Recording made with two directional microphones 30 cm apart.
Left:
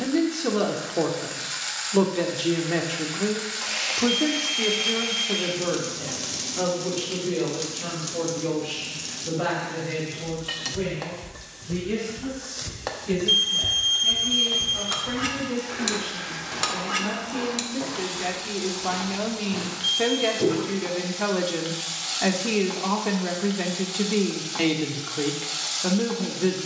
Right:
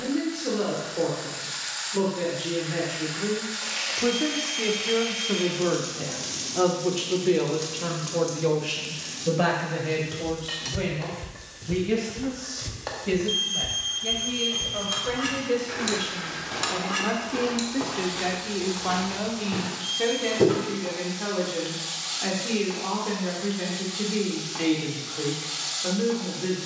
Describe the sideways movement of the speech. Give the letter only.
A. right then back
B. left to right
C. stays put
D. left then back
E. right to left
A.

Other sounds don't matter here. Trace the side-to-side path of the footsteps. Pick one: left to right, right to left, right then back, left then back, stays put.
left then back.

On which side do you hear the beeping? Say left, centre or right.
left.